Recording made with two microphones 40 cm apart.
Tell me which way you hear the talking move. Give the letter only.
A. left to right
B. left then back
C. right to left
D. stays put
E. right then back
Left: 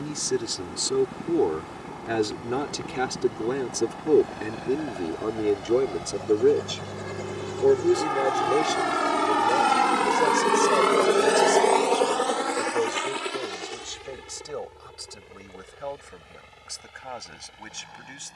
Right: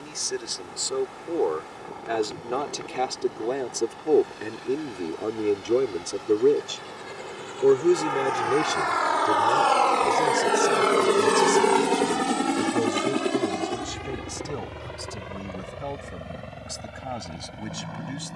A.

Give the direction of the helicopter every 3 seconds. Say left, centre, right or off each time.
left, left, left, centre, right, right.